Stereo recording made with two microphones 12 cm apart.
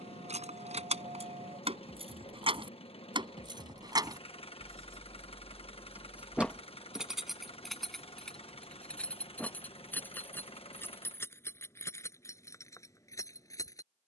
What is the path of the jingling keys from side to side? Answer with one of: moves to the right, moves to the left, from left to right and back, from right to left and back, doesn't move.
moves to the left.